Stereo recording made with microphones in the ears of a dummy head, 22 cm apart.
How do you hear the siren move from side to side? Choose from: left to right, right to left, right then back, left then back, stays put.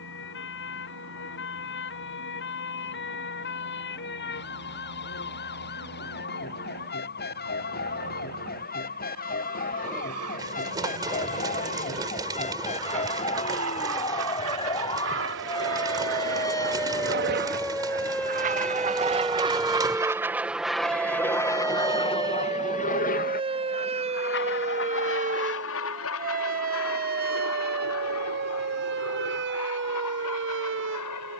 left to right.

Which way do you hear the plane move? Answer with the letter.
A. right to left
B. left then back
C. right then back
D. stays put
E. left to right
A.